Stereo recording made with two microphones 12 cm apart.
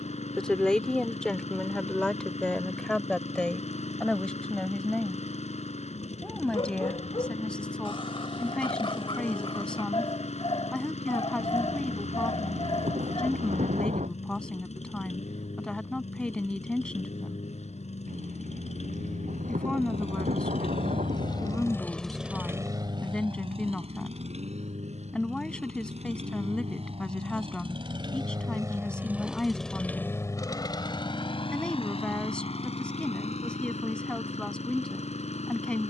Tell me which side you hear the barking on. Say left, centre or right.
left.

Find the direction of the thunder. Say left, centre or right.
right.